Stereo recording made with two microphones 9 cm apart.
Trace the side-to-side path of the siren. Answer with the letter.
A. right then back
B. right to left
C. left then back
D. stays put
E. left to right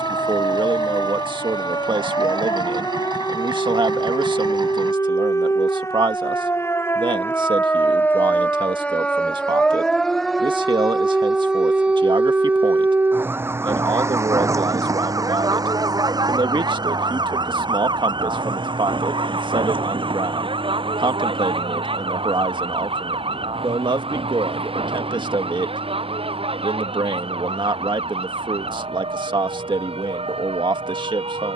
E.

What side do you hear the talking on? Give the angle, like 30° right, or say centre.
60° right.